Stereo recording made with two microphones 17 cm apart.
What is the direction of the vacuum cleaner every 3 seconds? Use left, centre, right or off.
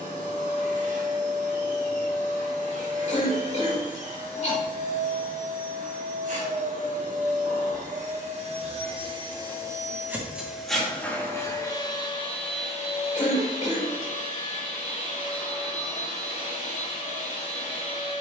right, right, right, centre, left, left.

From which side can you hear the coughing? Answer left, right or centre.
left.